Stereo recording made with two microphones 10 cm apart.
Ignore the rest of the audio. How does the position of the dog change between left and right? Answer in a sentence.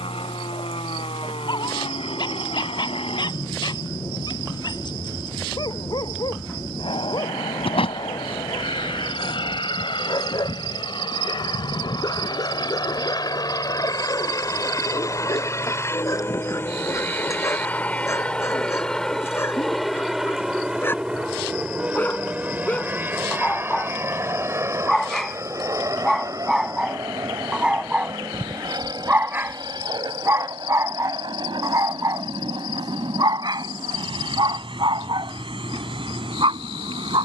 In this clip you hear the dog move from left to right.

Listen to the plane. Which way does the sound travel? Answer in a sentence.
In this clip you hear the plane move from left to right.